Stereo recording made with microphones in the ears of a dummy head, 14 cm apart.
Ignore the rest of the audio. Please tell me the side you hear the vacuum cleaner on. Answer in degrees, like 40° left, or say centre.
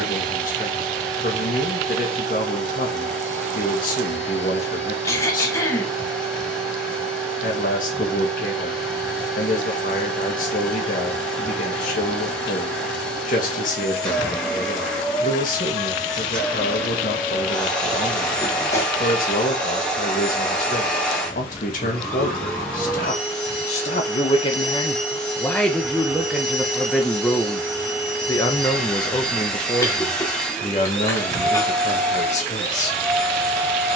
centre.